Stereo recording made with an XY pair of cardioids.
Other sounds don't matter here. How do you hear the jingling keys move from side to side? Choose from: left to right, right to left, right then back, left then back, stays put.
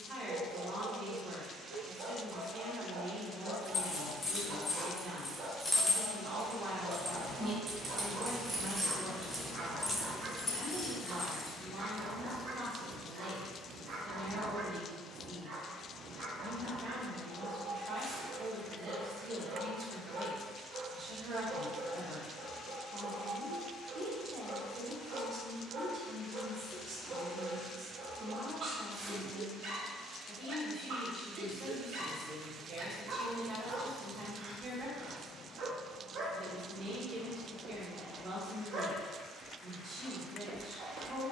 right then back.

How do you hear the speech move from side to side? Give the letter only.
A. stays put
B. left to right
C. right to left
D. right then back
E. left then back
A.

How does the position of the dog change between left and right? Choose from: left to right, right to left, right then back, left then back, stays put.
stays put.